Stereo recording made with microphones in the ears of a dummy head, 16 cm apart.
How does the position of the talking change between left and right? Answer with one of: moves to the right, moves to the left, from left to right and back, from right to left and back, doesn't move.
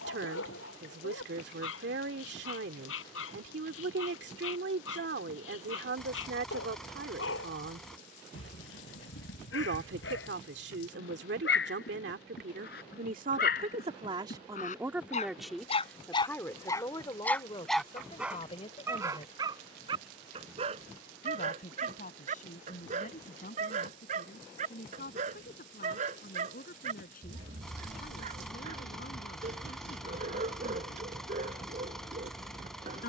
moves to the left.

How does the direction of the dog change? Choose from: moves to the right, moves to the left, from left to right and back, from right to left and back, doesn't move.
moves to the right.